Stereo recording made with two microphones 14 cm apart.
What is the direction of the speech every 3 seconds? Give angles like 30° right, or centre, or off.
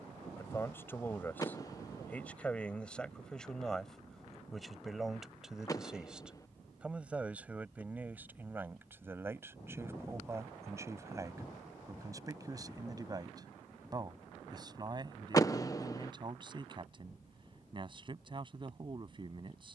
10° left, centre, 10° right, 20° right, 30° right, 30° right, 40° right.